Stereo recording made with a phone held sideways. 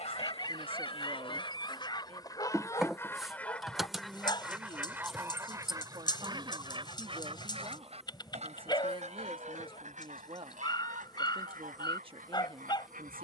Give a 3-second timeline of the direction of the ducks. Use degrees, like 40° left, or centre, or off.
30° left, 10° right, 40° right, 60° right, 70° right.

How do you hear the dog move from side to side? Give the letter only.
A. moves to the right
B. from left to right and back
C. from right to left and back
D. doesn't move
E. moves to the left
D.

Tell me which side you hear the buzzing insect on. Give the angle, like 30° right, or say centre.
centre.